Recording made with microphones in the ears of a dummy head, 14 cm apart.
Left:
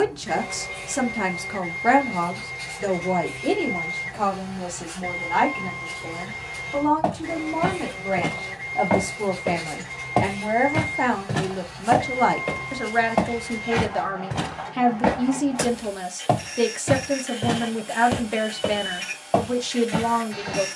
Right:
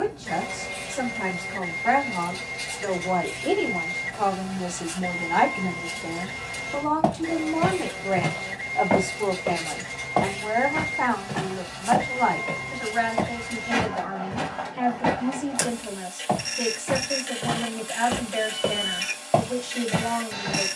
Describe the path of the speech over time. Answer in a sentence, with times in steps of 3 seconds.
In this clip you hear the speech on the left from 0 s, in the centre from 3 s and on the left from 9 s.